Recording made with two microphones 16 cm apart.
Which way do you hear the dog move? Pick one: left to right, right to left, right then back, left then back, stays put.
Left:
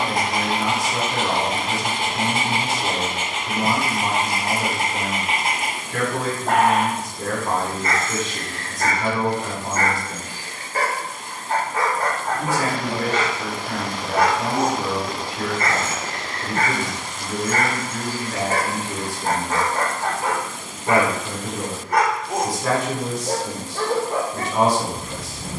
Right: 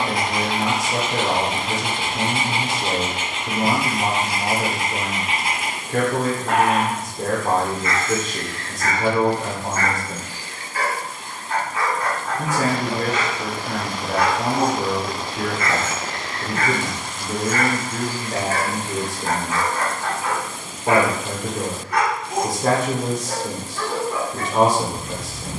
stays put.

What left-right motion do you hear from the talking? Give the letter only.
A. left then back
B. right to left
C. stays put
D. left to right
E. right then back
C.